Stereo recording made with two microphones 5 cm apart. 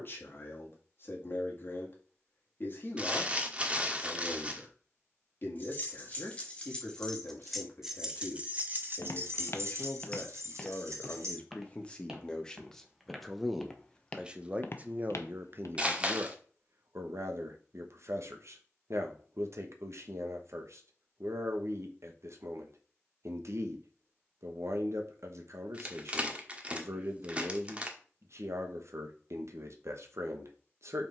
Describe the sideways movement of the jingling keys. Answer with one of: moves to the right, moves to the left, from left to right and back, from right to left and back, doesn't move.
moves to the right.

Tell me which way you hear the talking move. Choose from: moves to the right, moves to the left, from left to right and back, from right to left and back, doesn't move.
moves to the right.